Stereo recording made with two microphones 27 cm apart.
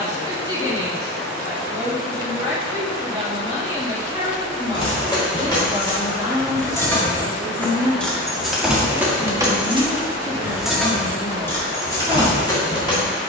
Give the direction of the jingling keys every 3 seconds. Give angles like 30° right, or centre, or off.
off, 20° left, 10° left, centre, 20° left.